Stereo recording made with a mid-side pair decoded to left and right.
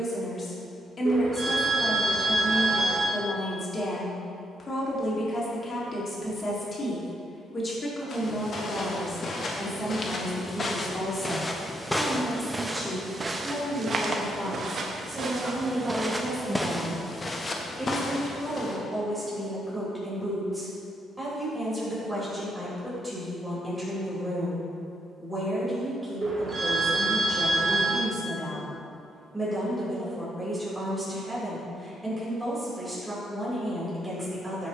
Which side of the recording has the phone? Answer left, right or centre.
right.